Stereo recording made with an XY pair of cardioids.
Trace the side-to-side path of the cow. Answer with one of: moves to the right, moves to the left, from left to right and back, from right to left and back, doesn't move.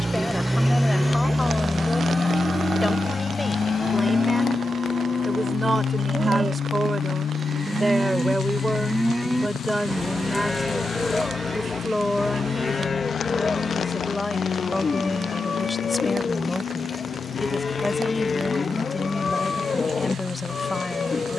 moves to the left.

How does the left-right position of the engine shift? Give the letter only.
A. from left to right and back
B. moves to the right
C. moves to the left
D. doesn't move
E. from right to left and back
C.